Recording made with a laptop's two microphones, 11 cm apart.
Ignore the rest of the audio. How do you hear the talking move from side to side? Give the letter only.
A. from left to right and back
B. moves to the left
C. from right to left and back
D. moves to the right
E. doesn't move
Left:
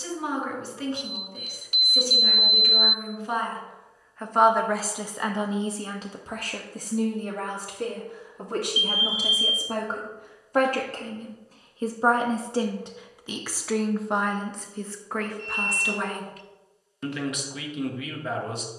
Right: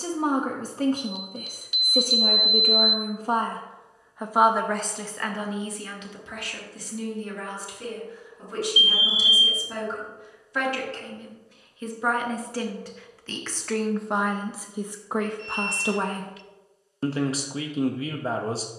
C.